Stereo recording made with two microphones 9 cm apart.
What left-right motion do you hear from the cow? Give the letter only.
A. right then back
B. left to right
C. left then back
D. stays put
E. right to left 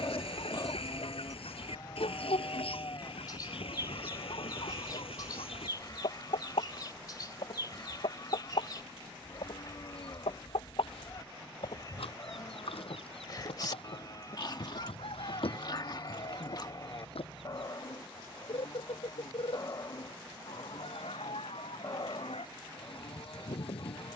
D.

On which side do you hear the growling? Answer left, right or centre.
left.